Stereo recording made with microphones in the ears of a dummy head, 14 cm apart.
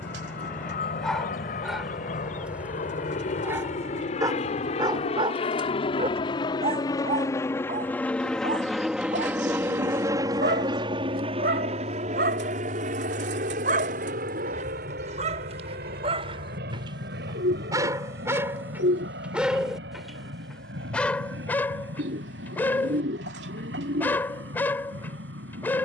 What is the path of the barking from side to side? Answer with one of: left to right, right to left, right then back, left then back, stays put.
right then back.